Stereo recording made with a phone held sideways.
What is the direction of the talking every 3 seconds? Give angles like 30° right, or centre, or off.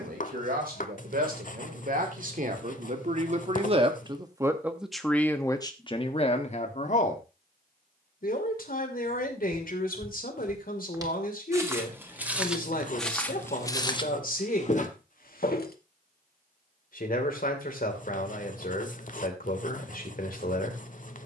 60° right, 10° right, 50° left, 70° left, 70° left, 70° left, 70° left.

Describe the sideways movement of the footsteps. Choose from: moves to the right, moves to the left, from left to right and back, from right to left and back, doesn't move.
moves to the left.